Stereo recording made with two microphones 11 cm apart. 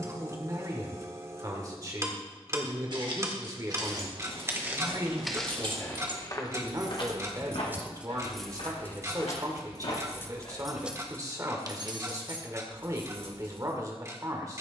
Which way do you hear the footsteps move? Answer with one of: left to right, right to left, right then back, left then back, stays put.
right to left.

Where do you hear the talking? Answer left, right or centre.
right.